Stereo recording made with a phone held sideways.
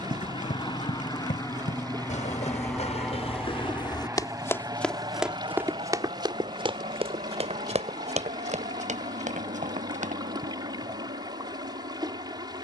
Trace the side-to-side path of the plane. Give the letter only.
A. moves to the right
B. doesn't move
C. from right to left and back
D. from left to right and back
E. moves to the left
A.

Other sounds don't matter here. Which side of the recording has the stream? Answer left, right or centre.
right.